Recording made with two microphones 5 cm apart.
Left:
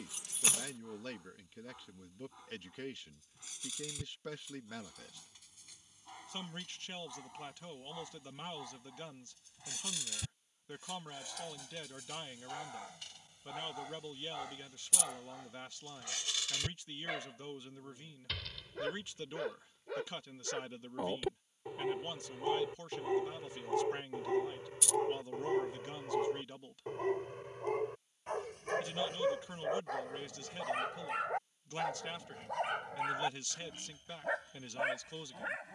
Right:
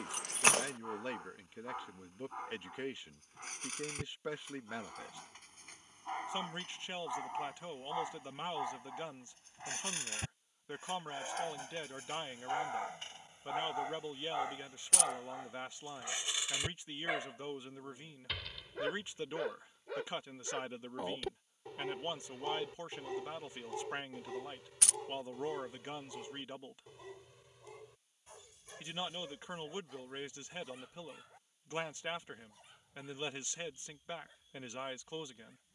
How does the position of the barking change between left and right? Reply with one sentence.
In this clip you hear the barking travel towards the left.